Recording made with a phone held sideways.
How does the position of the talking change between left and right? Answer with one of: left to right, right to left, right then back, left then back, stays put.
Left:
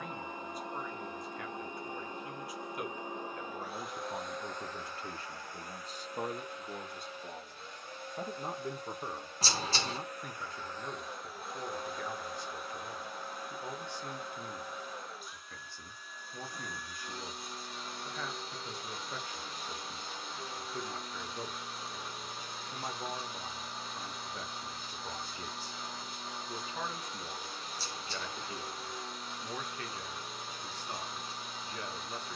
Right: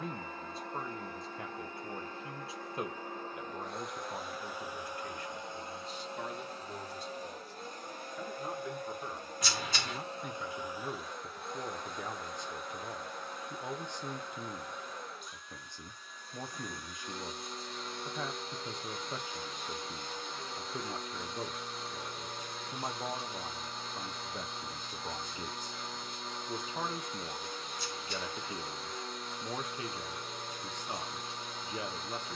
left then back.